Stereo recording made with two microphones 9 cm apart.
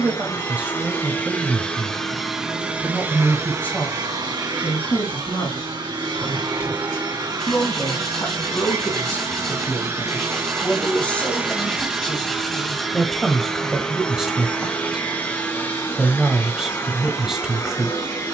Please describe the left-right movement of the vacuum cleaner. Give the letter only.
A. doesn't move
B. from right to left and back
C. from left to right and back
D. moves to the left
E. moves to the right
C.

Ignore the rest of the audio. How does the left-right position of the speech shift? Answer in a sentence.
You can hear the speech go left and come back.